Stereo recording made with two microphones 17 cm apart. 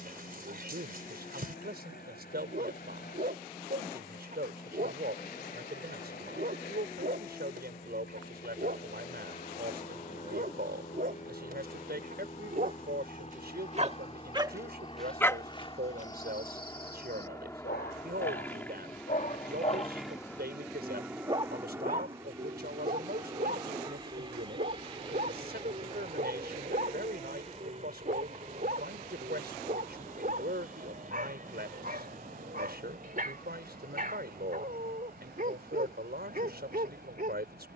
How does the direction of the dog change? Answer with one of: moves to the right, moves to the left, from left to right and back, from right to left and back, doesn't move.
from right to left and back.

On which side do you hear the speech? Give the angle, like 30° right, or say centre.
70° right.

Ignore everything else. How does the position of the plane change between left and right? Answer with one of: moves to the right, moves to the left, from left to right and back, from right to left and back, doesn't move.
moves to the right.